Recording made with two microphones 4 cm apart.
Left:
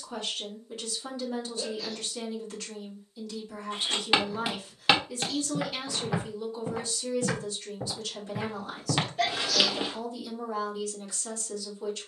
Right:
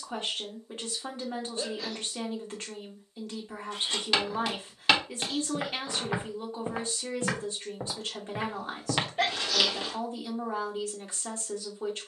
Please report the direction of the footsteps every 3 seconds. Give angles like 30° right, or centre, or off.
off, 10° left, 30° right, 10° left.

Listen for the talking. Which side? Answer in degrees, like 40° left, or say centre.
40° right.